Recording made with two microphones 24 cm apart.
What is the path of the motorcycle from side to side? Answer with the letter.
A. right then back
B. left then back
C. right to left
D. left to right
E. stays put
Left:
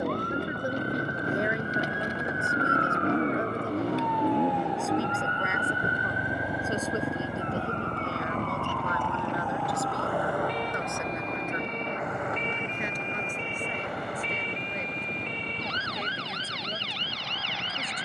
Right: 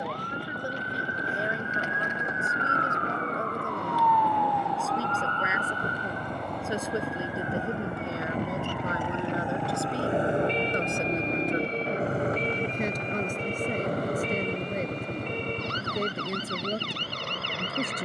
D.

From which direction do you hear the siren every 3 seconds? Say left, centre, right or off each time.
left, left, centre, right, right, right.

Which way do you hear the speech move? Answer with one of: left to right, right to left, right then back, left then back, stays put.
left to right.